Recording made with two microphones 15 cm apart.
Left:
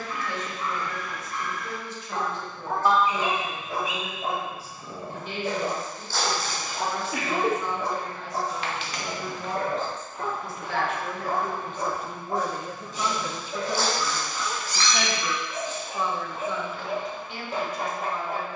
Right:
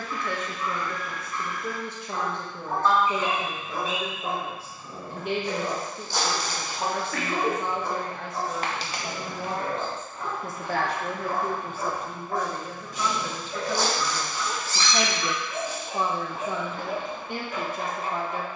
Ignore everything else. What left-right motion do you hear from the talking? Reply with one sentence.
In this clip you hear the talking go left and come back.